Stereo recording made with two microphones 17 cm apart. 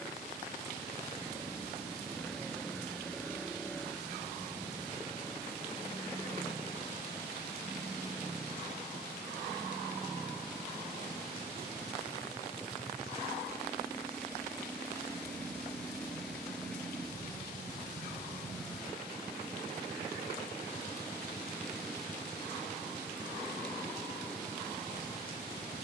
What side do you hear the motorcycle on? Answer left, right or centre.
centre.